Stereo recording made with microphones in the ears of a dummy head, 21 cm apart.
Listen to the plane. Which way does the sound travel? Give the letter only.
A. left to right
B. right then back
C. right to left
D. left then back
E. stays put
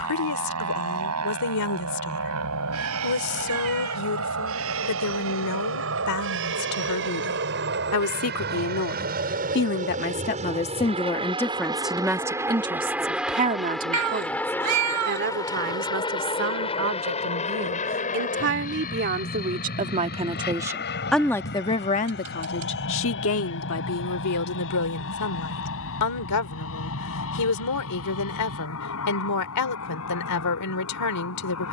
C.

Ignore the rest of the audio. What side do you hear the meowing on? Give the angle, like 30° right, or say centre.
80° right.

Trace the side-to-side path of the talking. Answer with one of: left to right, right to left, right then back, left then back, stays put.
right then back.